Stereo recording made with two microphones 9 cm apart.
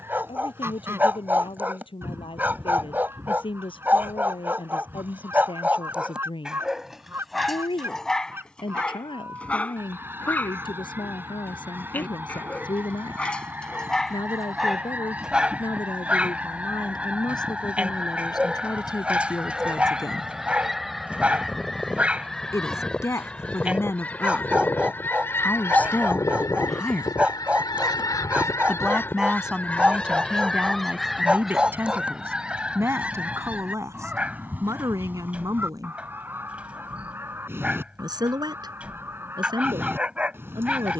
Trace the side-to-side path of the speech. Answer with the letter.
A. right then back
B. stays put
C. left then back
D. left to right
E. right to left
D.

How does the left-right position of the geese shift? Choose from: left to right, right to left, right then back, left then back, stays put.
left then back.